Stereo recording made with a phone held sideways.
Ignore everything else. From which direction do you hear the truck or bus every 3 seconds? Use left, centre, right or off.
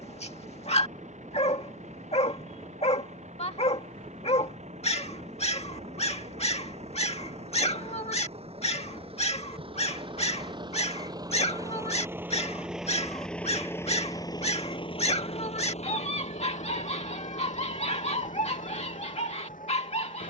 right, right, right, right, centre, left, left.